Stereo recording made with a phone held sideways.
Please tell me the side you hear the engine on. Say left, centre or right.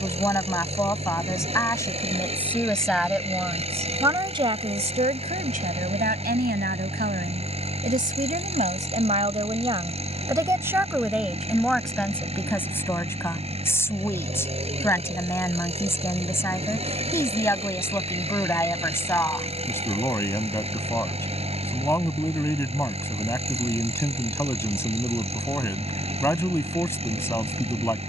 right.